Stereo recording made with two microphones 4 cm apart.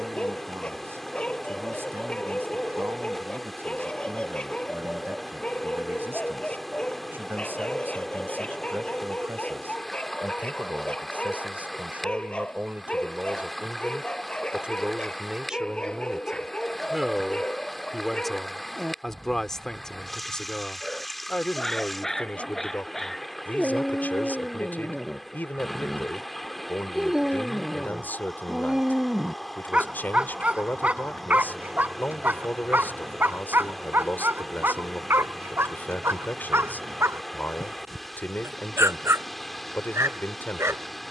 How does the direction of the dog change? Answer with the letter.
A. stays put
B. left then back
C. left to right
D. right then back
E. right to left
C.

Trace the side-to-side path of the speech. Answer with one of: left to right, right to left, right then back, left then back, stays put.
right to left.